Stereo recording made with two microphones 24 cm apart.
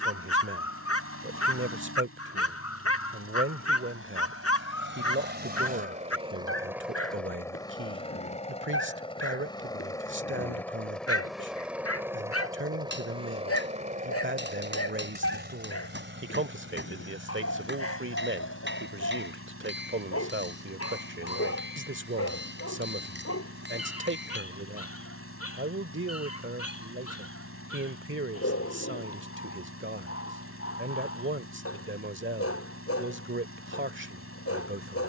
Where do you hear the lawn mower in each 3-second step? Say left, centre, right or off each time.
right, right, centre, centre, right, right, right, right, right, right, right, right.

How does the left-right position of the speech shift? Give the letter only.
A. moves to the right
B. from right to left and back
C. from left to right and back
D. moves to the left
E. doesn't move
E.